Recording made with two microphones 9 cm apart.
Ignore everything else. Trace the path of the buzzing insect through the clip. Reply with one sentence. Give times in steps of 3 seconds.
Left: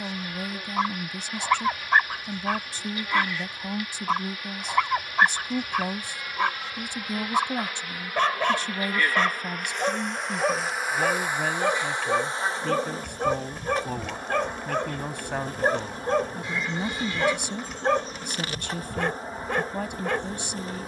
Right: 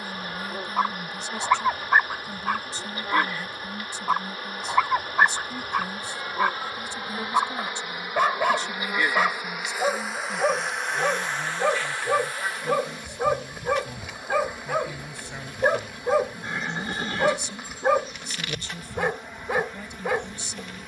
You can hear the buzzing insect on the right from 0 s, in the centre from 9 s and on the left from 12 s.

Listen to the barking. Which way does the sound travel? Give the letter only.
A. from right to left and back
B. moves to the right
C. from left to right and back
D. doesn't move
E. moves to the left
D.